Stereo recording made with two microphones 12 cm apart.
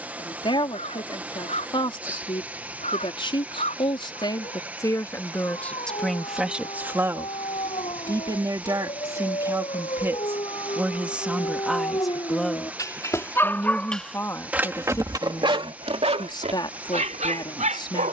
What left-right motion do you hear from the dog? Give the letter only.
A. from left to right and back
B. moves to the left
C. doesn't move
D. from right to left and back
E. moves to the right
E.